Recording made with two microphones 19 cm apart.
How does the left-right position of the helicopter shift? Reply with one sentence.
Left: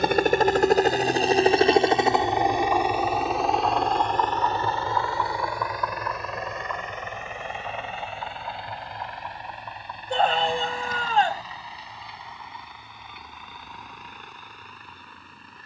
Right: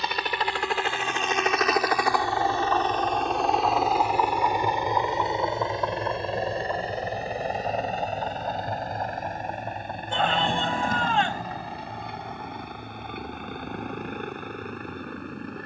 You can hear the helicopter travel towards the right.